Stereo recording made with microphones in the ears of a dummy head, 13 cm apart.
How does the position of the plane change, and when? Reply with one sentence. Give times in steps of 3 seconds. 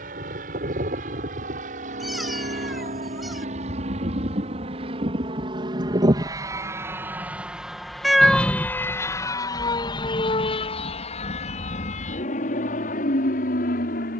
In this clip you hear the plane on the right from 0 s, in the centre from 6 s and on the left from 9 s.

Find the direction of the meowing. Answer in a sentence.
You can hear the meowing in the centre.